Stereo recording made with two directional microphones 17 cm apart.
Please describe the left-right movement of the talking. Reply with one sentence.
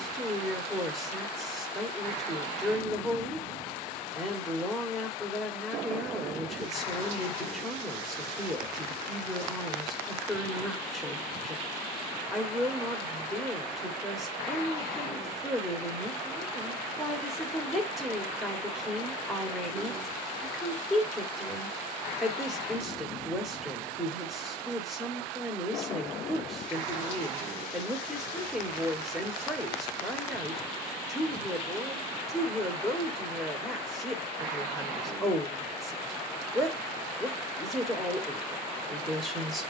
In this clip you hear the talking stay put.